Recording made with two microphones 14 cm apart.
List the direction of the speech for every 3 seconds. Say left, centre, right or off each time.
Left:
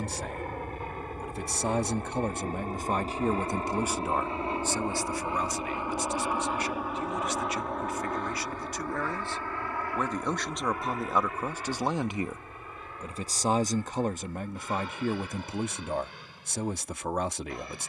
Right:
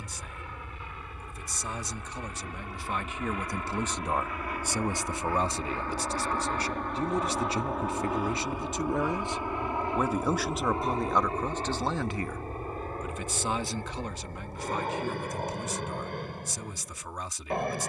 left, centre, right, centre, left, left.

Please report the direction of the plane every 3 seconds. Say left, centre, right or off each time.
left, left, centre, right, right, right.